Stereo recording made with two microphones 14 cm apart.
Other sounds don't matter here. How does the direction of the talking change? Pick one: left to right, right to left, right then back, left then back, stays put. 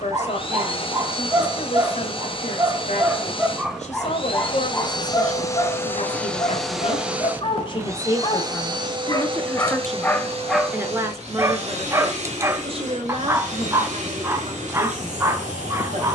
left to right.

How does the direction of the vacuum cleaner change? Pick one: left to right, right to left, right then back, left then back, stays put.
left to right.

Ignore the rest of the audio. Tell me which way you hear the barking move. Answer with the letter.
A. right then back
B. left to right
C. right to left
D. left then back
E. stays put
D.